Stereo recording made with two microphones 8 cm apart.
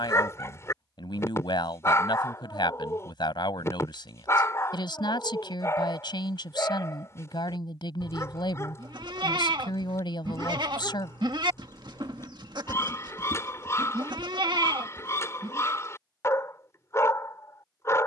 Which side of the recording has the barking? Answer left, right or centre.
left.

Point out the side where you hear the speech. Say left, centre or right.
left.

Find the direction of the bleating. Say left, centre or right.
right.